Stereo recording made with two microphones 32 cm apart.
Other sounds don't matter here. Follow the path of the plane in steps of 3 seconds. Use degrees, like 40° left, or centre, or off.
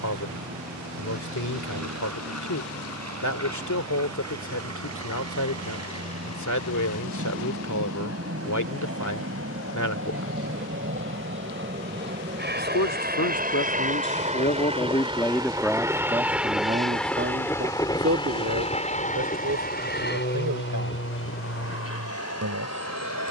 60° right, 60° right, 50° right, 40° right, 30° right, centre, 30° left, 40° left.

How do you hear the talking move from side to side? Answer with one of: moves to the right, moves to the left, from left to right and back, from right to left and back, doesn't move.
moves to the right.